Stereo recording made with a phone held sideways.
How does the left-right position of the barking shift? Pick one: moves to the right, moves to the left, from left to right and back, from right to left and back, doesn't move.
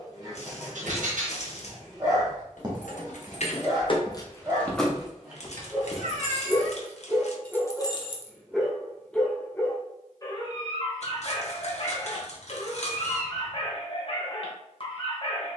moves to the left.